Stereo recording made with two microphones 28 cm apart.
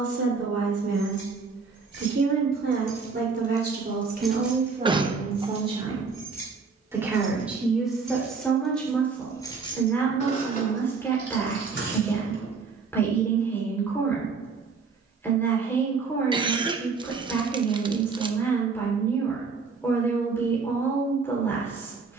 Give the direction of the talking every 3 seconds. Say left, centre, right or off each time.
right, right, centre, centre, centre, centre, centre, centre.